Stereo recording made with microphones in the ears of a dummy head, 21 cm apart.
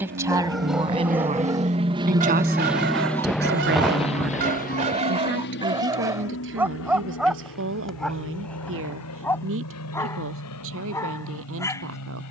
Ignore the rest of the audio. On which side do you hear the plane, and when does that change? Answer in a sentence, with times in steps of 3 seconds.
In this clip you hear the plane on the right from 0 s and on the left from 3 s.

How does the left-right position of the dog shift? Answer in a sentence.
In this clip you hear the dog move from left to right and back again.